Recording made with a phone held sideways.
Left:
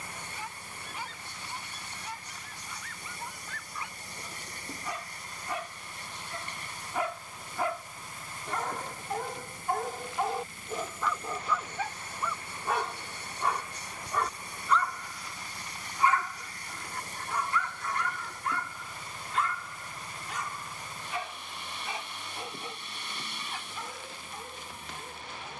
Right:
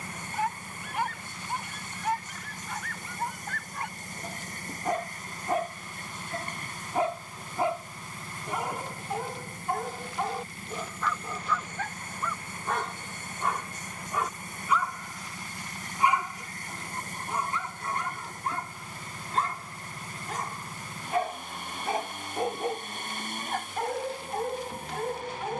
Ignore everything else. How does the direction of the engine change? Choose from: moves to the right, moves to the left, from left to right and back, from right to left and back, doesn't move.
doesn't move.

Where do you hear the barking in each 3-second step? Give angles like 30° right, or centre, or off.
70° right, 60° right, 20° right, centre, centre, 20° right, 40° right, 60° right, 70° right.